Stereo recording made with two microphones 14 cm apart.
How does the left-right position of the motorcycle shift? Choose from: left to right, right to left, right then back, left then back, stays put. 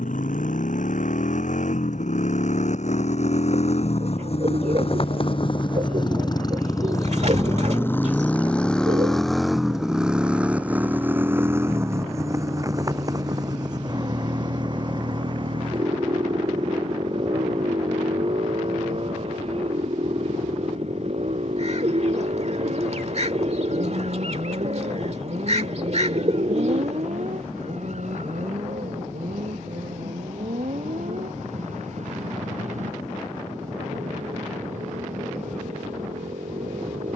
left to right.